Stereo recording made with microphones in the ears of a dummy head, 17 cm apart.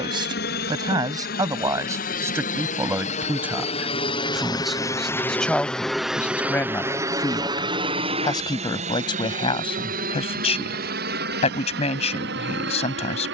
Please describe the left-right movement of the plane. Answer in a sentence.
In this clip you hear the plane go from the left side to the right.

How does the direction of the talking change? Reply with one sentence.
In this clip you hear the talking go from the right side to the left.